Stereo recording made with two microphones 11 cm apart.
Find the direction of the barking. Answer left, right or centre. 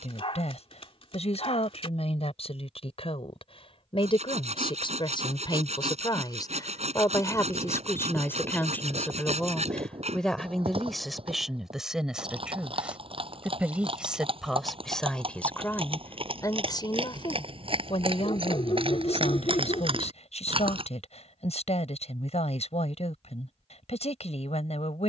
left.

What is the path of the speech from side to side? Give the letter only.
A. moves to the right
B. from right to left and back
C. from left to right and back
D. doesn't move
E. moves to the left
C.